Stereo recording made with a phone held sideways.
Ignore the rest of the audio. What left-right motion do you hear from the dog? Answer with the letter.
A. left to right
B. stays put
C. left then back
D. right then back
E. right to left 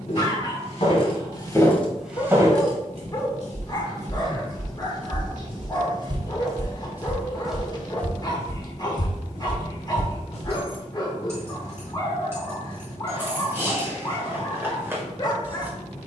B.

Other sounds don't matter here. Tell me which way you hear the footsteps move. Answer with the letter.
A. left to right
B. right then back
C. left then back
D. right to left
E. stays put
B.